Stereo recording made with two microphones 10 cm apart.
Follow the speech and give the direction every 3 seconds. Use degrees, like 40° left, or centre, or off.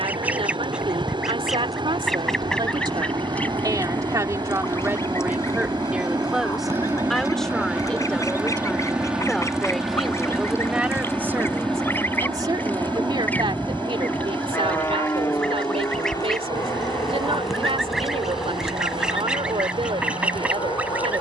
60° right, 30° right, 10° left, 10° right, 60° right, 70° right, 70° right.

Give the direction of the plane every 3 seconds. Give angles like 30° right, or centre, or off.
50° right, 40° right, 20° right, centre, 20° left, 30° left, 40° left.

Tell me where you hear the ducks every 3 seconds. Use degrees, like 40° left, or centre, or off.
centre, 20° left, 40° left, 30° left, 20° left, centre, 10° right.